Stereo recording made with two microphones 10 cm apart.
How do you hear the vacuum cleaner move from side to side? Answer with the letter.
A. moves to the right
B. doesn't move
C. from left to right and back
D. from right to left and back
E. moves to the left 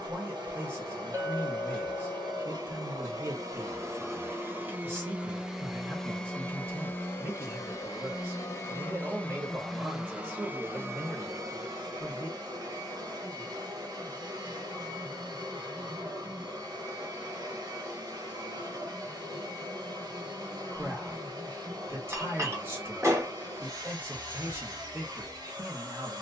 D.